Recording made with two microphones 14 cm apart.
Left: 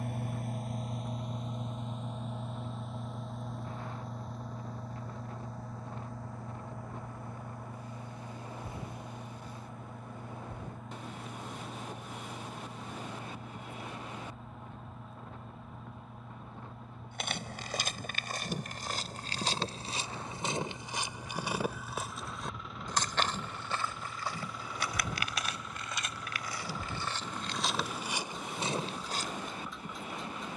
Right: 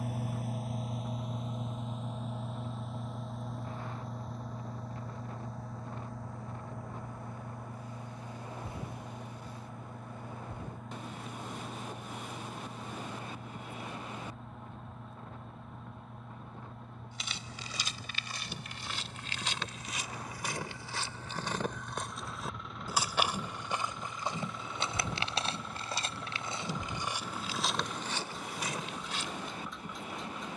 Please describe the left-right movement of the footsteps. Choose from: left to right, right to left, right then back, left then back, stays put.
right then back.